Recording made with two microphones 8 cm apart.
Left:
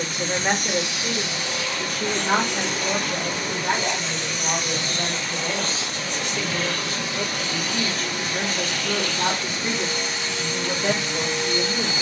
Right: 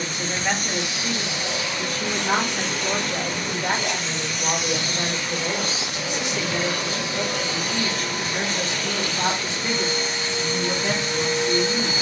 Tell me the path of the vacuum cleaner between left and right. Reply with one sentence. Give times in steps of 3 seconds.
You can hear the vacuum cleaner on the right from 0 s, in the centre from 3 s and on the right from 6 s.